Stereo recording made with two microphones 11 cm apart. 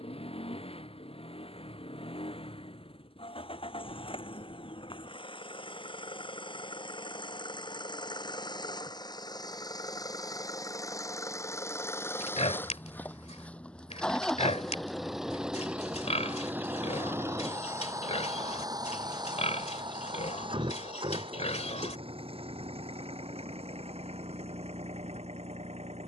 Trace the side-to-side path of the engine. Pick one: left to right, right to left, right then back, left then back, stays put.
left to right.